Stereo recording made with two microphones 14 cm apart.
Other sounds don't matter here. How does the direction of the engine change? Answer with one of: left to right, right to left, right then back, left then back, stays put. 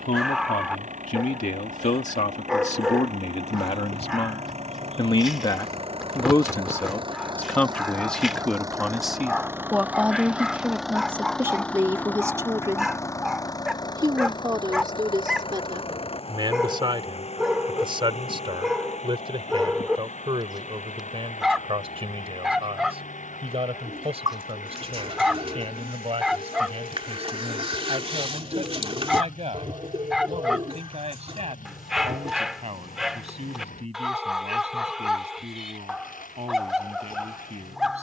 right to left.